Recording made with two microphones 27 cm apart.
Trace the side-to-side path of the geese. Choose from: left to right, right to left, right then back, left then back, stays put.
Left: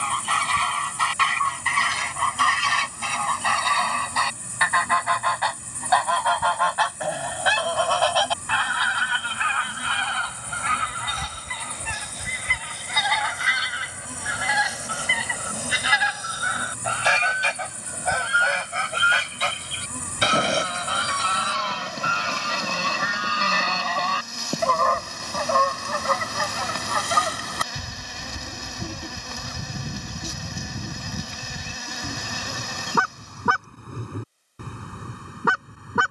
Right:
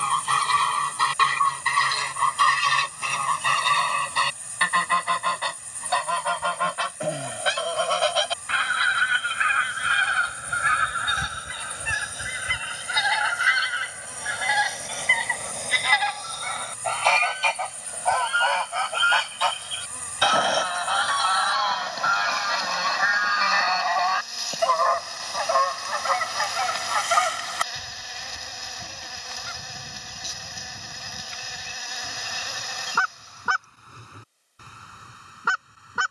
right to left.